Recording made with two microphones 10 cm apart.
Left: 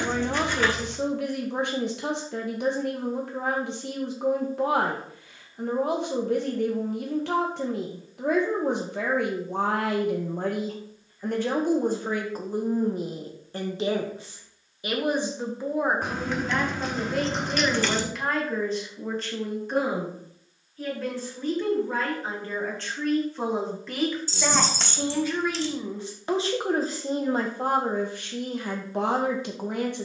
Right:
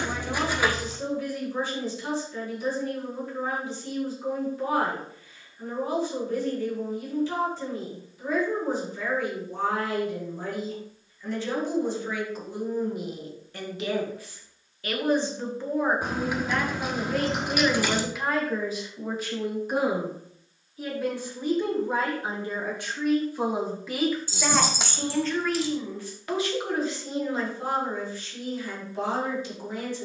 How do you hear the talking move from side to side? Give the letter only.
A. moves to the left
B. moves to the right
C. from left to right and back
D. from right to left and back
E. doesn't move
C.